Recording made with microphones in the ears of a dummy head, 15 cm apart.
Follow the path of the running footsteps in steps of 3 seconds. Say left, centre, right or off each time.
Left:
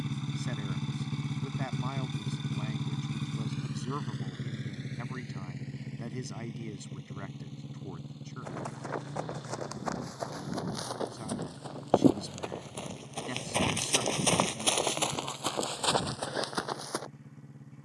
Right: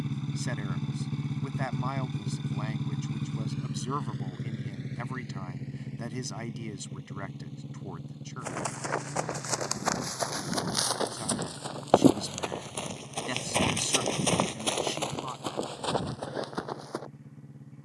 off, off, right, right, centre, left.